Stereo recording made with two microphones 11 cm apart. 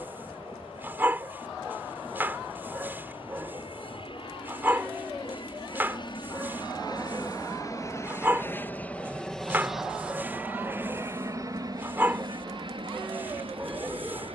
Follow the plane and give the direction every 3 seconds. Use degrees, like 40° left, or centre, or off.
70° left, 60° left, 30° left, 20° right, 50° right.